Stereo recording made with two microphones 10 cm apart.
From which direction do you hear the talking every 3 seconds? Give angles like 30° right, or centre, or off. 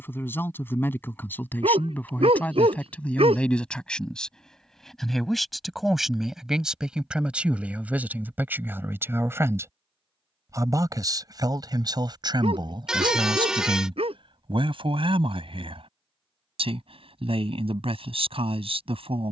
20° left, 10° left, 10° right, 30° right, 50° right, 70° right, 70° right.